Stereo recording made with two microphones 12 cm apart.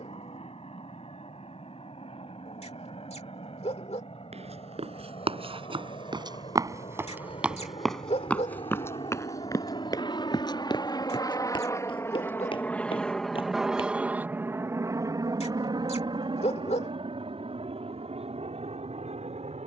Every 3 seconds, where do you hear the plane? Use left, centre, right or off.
left, left, left, left, centre, right, right.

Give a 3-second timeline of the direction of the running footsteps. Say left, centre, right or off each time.
off, right, centre, left, left, off, off.